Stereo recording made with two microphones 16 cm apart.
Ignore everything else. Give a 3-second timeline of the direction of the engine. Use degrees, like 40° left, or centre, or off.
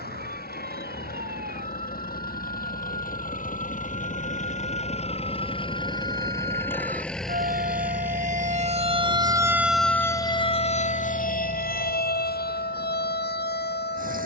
70° left, 50° left, centre, 40° right, 50° right.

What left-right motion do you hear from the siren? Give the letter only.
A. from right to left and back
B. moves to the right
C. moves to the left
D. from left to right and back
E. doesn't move
C.